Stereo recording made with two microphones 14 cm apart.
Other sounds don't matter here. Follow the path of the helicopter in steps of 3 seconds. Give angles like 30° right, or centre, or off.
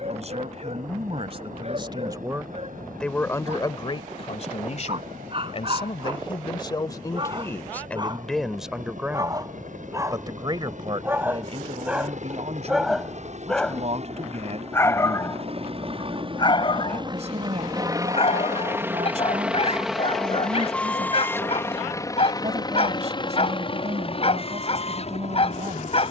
80° right, 70° right, 70° right, 60° right, 50° right, 40° right, 10° right, 30° left, 50° left.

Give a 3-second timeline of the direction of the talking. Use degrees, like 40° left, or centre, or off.
40° right, 40° left, 20° left, 30° right, 50° right, 50° right, 50° right, 50° right, 50° right.